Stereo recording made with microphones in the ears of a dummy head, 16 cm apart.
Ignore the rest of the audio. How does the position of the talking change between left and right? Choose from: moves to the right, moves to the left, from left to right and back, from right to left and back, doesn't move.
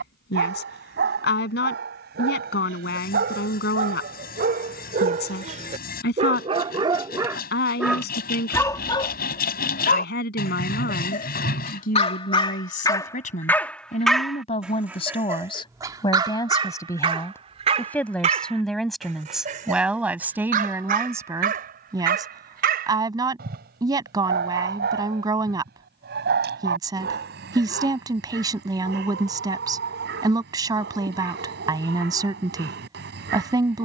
moves to the right.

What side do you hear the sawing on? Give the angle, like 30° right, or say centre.
50° left.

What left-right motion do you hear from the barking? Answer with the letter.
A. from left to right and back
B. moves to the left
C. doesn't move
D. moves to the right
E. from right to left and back
E.